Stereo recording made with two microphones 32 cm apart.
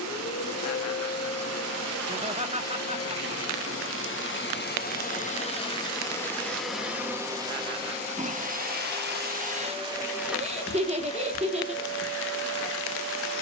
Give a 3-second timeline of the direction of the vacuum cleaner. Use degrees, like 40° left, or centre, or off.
50° left, 30° left, 10° right, centre, 40° left.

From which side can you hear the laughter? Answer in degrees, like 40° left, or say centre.
20° right.